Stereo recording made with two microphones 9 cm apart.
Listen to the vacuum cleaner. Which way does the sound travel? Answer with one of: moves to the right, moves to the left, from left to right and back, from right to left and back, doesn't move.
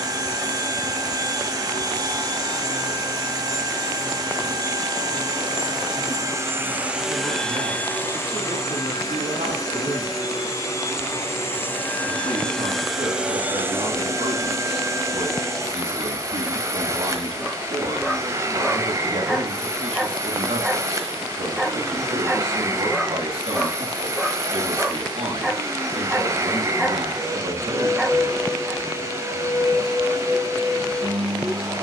from right to left and back.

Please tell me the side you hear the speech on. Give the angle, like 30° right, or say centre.
70° right.